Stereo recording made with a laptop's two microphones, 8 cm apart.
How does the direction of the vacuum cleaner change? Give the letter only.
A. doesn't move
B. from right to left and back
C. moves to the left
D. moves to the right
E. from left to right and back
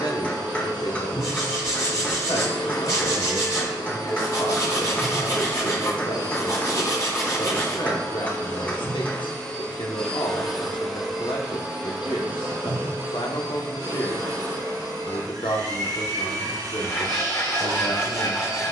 D.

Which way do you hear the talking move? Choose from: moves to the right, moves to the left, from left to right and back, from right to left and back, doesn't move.
doesn't move.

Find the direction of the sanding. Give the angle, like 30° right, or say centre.
40° left.